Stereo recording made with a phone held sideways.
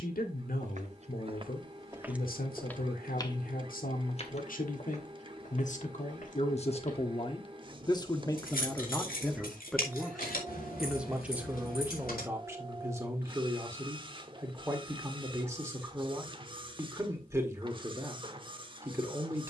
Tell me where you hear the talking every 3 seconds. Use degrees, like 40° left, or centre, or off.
80° left, 70° left, 30° left, centre, 20° right, 20° right, 20° right.